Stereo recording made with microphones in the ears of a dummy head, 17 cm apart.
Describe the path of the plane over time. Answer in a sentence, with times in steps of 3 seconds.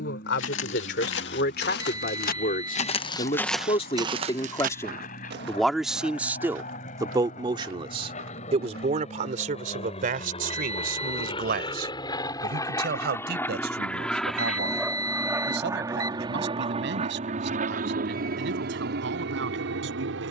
In this clip you hear the plane on the left from 0 s, in the centre from 12 s and on the right from 15 s.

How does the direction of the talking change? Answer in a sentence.
In this clip you hear the talking go from the left side to the right.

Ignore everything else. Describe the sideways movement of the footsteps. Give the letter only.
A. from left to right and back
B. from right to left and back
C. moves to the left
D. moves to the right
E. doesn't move
D.